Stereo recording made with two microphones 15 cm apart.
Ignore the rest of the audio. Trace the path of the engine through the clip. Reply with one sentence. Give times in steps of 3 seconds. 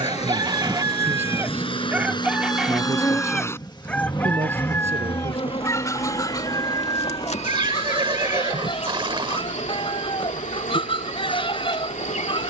In this clip you hear the engine on the left from 0 s, in the centre from 3 s and on the right from 6 s.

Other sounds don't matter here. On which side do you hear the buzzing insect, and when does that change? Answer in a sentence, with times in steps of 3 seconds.
You can hear the buzzing insect in the centre from 0 s and on the left from 3 s.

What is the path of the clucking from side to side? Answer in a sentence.
In this clip you hear the clucking go from the right side to the left.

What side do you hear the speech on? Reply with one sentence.
In this clip you hear the speech on the right.